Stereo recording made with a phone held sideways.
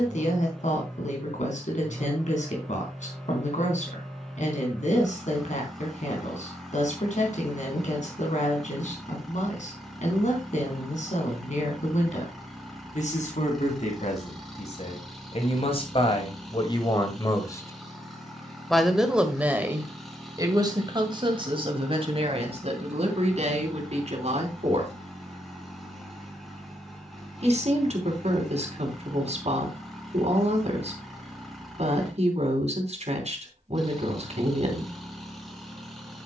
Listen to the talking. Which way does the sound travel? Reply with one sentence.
You can hear the talking move from left to right.